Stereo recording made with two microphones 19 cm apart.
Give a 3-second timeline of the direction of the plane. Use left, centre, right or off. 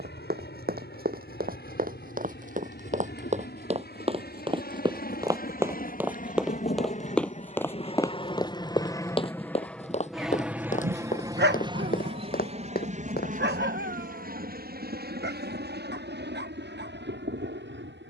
left, left, left, centre, right, right.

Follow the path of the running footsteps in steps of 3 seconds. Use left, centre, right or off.
right, right, centre, left, left, off.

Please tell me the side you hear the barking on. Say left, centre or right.
right.